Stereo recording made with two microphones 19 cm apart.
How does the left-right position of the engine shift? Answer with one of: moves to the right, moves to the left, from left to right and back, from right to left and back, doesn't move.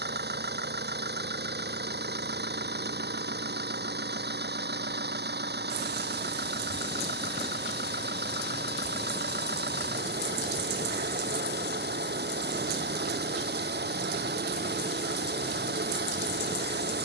doesn't move.